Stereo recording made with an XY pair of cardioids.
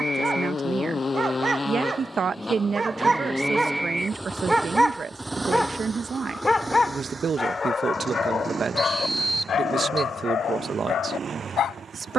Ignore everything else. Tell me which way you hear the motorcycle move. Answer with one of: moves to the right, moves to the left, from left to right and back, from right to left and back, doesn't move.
moves to the right.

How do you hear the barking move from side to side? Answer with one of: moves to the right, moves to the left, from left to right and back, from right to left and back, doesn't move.
moves to the left.